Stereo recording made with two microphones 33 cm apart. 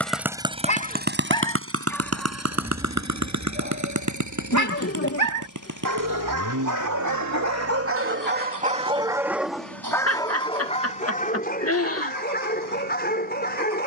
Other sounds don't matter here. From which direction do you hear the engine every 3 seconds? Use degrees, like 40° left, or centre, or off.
30° right, 60° right, 70° right, 70° right, 70° right.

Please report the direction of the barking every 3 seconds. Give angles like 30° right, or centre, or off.
10° left, 50° right, 50° right, 10° left, 30° left.